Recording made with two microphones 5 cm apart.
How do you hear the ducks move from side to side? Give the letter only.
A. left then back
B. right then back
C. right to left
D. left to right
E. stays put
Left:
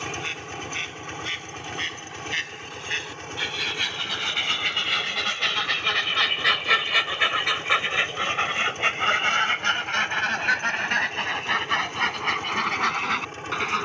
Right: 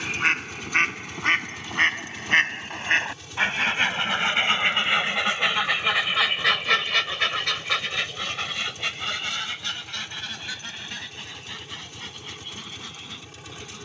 C.